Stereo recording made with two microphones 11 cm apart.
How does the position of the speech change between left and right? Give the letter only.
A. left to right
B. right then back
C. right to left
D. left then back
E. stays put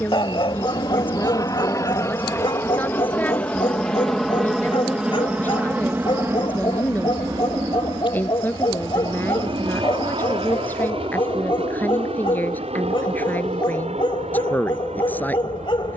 E.